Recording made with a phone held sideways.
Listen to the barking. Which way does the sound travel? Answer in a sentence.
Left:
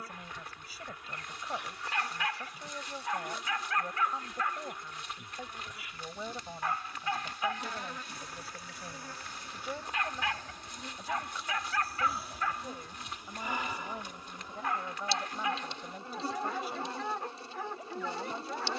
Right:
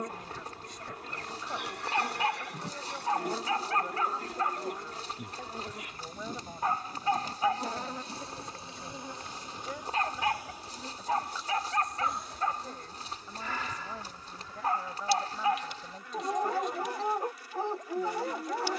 You can hear the barking stay in one place.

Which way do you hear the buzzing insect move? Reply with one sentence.
In this clip you hear the buzzing insect travel towards the left.